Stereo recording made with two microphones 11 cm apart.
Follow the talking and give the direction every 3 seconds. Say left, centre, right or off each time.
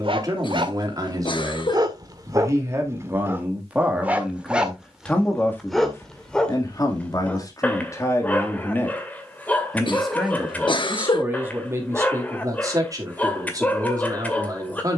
right, centre, left, centre, right.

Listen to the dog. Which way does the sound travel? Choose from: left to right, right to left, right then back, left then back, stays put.
right to left.